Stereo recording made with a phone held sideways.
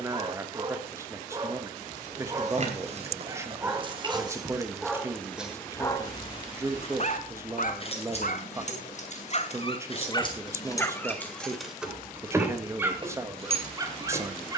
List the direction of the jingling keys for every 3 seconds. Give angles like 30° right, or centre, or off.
50° right, 30° right, 40° left, 20° left, 30° right.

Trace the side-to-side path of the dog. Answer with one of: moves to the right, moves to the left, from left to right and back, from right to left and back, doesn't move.
from right to left and back.